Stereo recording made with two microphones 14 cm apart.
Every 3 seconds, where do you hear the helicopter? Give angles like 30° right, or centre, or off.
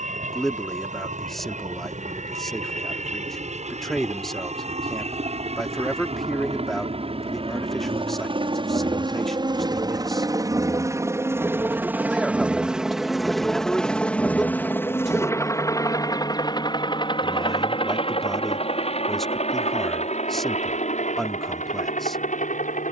60° right, 50° right, 40° right, 20° right, centre, 30° left, 50° left, 60° left.